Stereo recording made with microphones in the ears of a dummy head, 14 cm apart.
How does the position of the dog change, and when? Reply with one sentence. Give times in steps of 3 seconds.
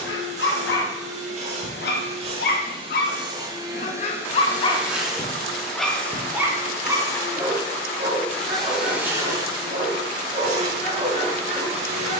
You can hear the dog on the left from 0 s and on the right from 6 s.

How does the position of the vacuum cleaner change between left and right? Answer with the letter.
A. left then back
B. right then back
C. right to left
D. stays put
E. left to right
A.